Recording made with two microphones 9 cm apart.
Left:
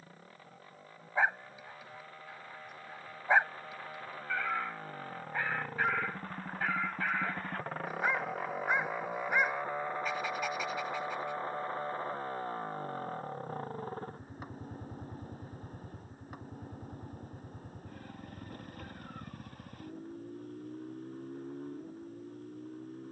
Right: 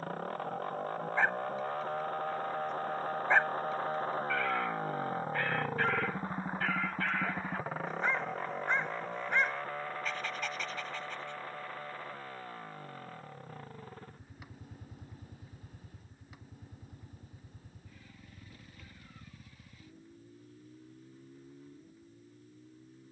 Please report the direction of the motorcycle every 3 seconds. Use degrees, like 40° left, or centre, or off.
60° right, 40° right, 10° right, 20° left, 40° left, 40° left, 50° left, 50° left.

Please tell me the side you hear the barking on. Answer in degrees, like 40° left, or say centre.
10° left.